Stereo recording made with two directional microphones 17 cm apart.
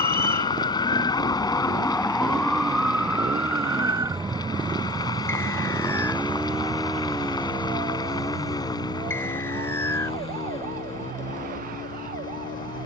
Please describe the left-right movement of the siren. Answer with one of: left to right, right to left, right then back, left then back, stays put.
left to right.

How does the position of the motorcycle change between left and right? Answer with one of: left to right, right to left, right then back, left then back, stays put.
right to left.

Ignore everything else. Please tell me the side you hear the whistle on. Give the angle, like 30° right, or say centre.
10° left.